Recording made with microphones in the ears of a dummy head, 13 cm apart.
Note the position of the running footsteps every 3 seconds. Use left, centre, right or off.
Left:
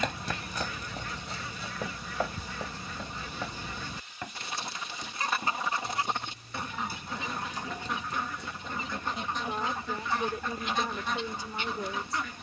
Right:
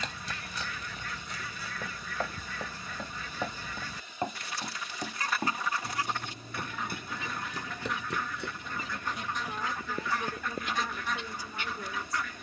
left, right, right, right.